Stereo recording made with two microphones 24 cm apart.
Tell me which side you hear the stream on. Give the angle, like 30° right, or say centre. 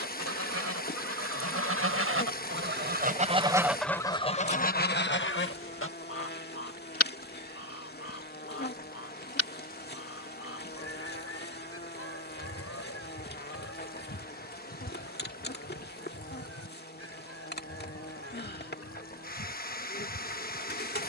40° left.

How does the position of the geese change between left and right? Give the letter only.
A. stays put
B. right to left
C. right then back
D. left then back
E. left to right
B.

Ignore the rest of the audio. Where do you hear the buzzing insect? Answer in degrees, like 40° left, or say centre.
40° left.